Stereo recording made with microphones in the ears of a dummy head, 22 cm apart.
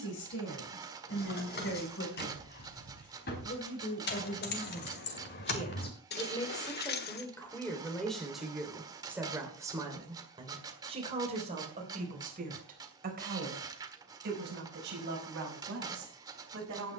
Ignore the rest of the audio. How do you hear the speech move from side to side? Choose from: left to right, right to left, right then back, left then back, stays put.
left to right.